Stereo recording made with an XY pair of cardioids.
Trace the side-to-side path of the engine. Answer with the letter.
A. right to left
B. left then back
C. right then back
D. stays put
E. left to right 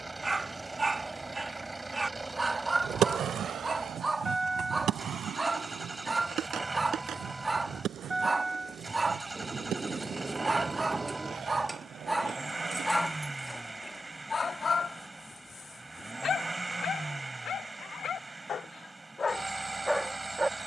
D.